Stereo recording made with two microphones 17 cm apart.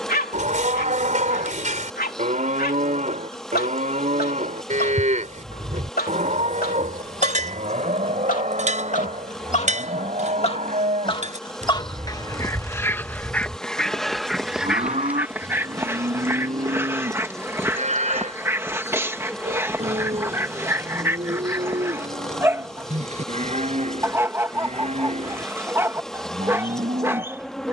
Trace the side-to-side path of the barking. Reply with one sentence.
In this clip you hear the barking move from left to right.